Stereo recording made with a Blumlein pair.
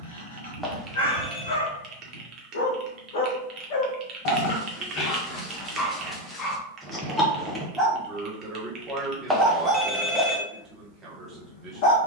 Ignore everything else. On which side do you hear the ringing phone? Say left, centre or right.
centre.